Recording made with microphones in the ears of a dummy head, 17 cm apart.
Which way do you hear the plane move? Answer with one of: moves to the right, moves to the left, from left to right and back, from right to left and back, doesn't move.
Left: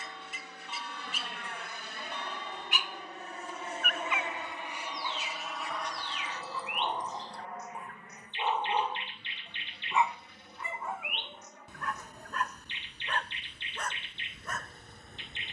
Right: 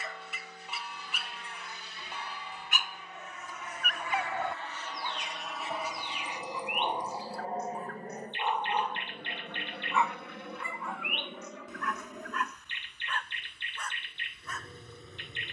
moves to the right.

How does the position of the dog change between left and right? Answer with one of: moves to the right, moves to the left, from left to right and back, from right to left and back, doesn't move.
moves to the left.